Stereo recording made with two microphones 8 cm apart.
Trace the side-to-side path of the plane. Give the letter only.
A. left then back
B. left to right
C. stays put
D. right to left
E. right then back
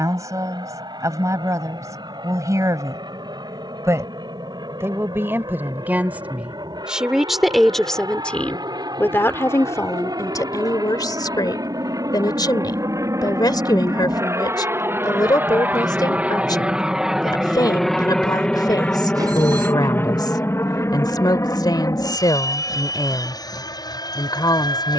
D.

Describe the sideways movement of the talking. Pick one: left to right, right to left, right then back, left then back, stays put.
right to left.